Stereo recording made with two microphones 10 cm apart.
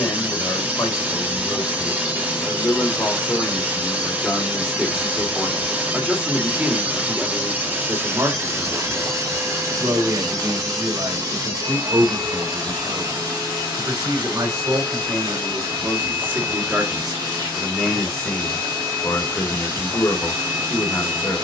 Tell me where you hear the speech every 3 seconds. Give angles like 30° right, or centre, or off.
30° left, 10° left, 20° right, 50° right, 50° right, 20° right, 20° left.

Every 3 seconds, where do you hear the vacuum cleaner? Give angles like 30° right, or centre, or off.
20° right, 20° right, 20° right, 40° right, 50° right, 50° right, 50° right.